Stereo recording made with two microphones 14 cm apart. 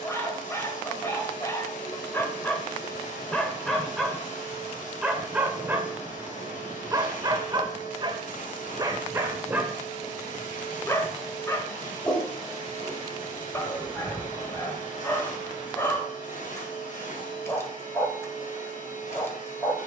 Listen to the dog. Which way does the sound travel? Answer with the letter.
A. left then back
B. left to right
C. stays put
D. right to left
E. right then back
E.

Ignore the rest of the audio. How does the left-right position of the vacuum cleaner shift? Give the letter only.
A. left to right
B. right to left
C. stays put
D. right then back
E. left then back
C.